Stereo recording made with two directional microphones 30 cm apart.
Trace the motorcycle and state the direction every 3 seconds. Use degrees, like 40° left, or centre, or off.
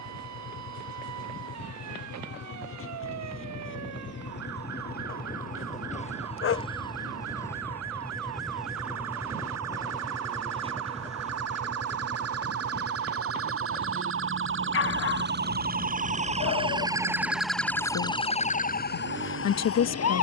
50° left, 30° left, 10° left, 20° right, 30° right, 50° right, 50° right.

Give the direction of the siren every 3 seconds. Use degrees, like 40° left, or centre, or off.
70° right, 70° right, 60° right, 60° right, 50° right, 20° right, 40° left.